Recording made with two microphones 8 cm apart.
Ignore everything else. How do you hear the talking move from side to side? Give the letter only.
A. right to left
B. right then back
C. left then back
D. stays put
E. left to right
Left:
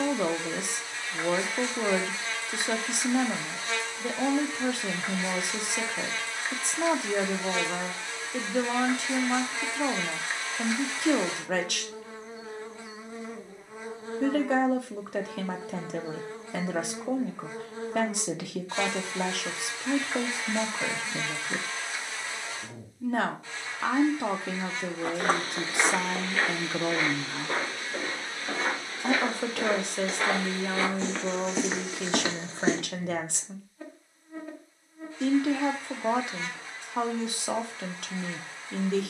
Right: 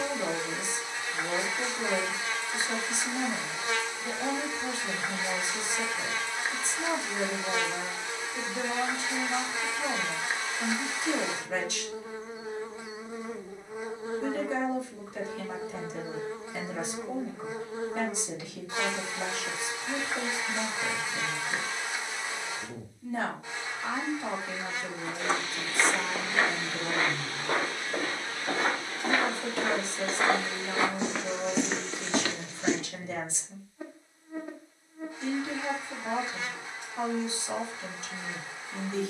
D.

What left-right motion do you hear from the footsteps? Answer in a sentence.
In this clip you hear the footsteps move from left to right and back again.